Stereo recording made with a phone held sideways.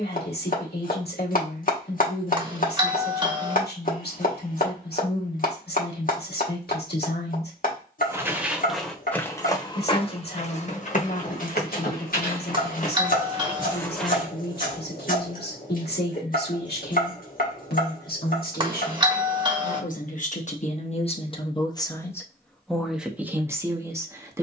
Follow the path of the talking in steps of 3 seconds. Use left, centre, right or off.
left, left, left, left, left, left, left, centre.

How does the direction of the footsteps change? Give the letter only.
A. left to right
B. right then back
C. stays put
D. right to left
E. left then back
E.